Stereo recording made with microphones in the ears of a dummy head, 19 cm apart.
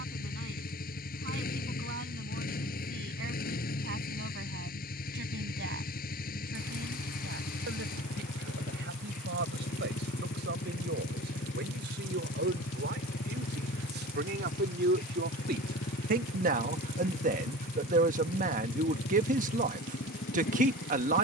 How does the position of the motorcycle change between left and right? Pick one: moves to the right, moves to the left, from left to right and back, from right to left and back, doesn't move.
doesn't move.